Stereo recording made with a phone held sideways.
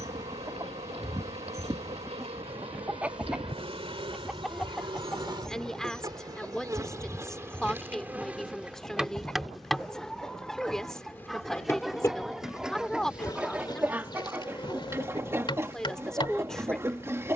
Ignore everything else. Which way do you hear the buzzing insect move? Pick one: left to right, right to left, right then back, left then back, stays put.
right to left.